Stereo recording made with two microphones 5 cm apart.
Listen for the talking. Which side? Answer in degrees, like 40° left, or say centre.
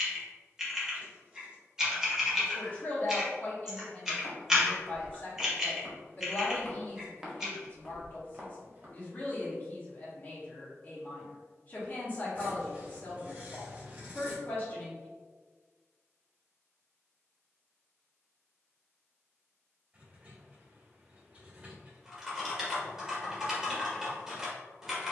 40° left.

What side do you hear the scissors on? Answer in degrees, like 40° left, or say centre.
30° right.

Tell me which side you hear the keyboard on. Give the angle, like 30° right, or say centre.
10° right.